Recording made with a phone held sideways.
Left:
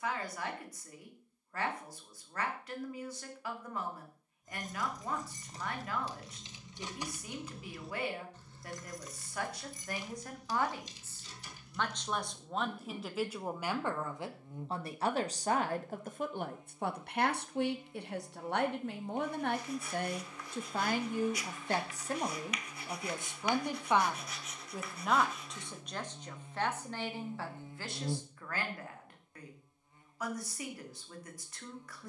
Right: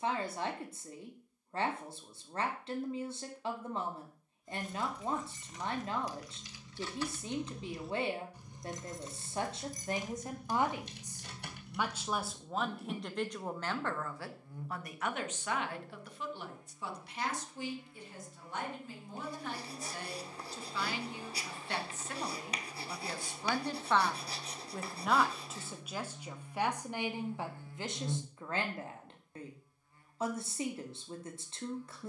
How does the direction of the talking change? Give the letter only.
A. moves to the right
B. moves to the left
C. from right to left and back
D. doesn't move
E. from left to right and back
C.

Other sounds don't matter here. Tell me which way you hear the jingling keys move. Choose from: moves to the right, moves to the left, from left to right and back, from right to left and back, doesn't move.
moves to the right.